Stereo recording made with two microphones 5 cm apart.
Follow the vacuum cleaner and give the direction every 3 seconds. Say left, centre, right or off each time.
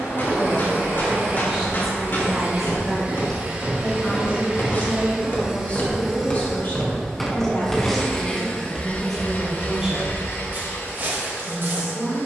right, right, centre, left.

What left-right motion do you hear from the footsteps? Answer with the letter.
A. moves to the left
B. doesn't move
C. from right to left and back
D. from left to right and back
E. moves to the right
E.